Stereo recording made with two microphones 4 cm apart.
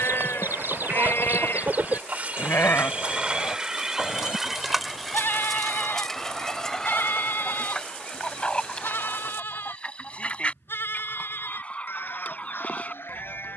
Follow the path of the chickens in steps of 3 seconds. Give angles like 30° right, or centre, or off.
50° right, centre, 20° left, 30° left, 40° left.